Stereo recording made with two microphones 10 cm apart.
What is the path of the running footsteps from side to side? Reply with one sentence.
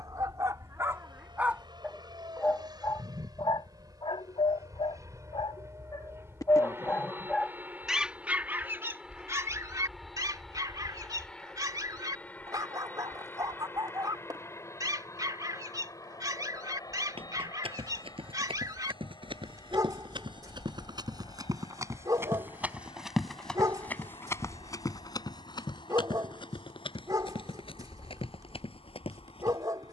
You can hear the running footsteps travel towards the left.